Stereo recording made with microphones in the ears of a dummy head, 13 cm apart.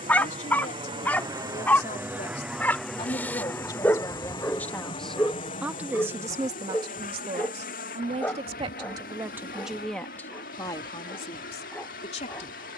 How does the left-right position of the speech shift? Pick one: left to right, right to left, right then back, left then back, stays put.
right then back.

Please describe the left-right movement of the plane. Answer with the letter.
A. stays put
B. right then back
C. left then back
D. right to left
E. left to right
D.